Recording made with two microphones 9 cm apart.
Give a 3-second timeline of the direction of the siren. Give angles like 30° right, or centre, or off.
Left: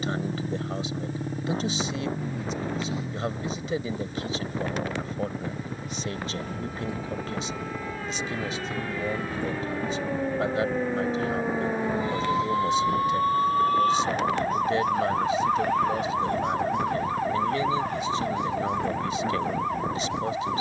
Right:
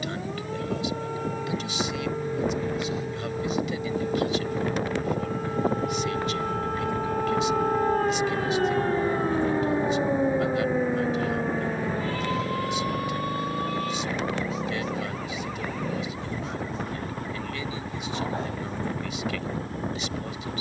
80° right, 70° right, 50° right, 10° right, 40° left, 60° left, 70° left.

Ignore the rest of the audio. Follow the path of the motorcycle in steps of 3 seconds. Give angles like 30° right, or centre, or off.
40° left, 20° left, centre, 30° right, 40° right, 50° right, 60° right.